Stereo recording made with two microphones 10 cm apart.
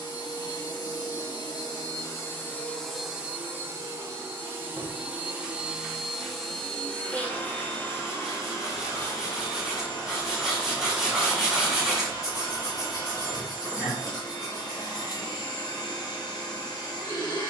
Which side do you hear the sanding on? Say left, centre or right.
centre.